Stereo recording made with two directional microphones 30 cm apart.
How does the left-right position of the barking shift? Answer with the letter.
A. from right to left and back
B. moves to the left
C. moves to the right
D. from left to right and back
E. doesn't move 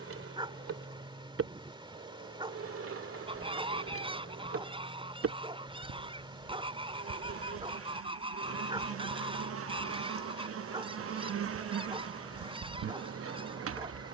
E.